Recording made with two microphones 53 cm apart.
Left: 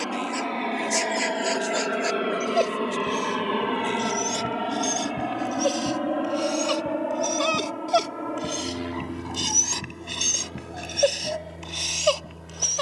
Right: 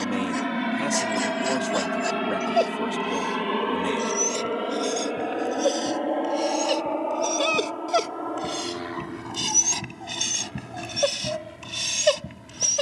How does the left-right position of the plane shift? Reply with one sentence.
In this clip you hear the plane move to the left.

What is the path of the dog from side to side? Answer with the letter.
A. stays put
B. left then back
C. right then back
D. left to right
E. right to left
D.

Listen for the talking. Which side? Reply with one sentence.
In this clip you hear the talking on the right.